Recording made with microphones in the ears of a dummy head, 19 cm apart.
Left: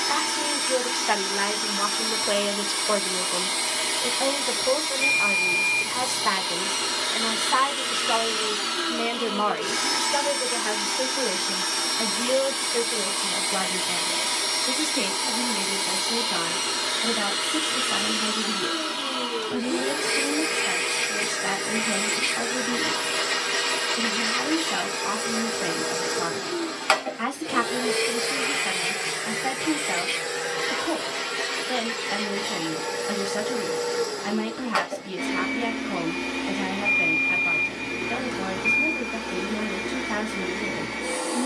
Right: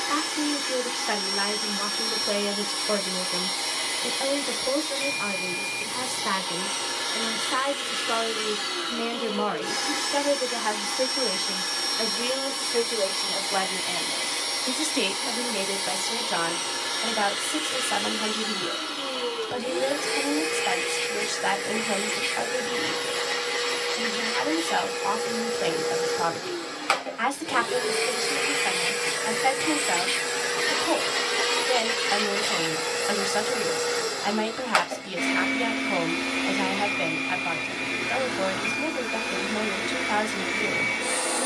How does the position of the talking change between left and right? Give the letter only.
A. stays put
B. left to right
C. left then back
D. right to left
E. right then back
B.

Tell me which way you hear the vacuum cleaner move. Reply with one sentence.
You can hear the vacuum cleaner travel towards the right.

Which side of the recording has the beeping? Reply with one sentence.
You can hear the beeping in the centre.